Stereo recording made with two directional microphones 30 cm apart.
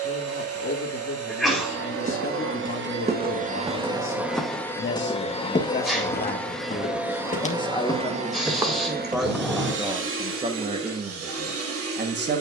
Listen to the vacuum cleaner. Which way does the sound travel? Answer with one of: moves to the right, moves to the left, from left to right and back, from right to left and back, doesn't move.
from right to left and back.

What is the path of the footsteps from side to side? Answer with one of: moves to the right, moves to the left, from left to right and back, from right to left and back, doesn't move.
from right to left and back.